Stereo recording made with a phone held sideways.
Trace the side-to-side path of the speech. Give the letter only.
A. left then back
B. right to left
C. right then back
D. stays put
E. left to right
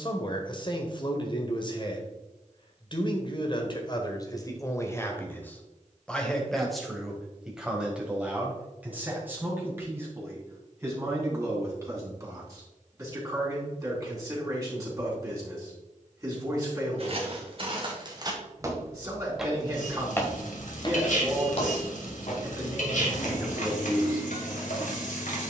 E.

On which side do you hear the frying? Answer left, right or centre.
left.